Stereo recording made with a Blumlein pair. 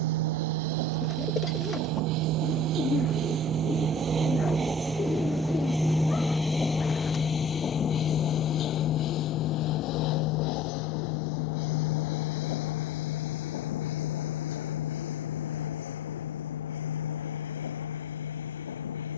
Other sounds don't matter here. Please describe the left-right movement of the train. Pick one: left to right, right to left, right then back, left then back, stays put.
right to left.